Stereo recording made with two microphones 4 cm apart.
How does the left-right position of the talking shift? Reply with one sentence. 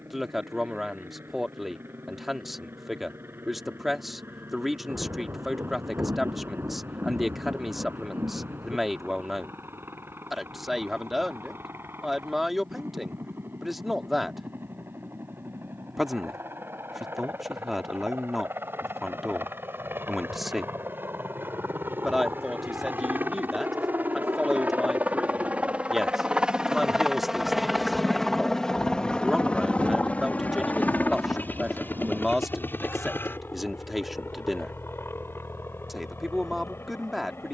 You can hear the talking stay in one place.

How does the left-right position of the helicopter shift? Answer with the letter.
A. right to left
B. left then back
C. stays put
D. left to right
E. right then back
A.